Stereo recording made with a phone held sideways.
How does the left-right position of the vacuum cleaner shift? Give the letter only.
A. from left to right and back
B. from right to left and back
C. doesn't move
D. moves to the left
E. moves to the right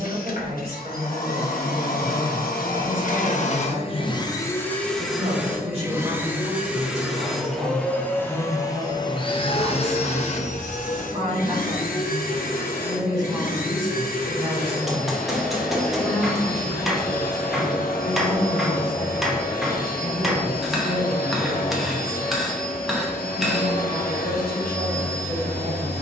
A.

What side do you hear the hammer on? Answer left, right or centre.
centre.